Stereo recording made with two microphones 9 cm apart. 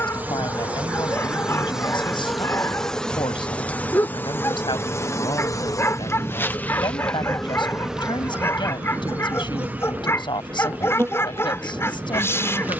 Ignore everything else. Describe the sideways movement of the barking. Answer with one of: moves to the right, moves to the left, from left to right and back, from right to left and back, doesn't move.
doesn't move.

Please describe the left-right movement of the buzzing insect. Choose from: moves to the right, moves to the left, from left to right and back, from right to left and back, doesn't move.
from right to left and back.